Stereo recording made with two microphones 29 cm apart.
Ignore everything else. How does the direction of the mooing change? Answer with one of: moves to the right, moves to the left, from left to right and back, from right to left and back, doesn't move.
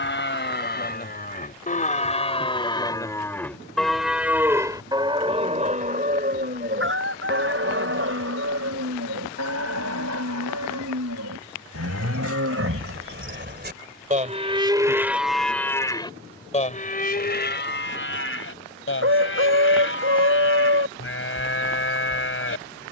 from left to right and back.